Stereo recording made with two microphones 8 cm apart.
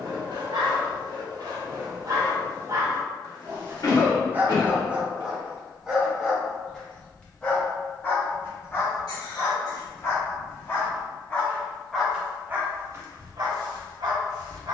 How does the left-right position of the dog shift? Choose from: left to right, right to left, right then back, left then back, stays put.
left then back.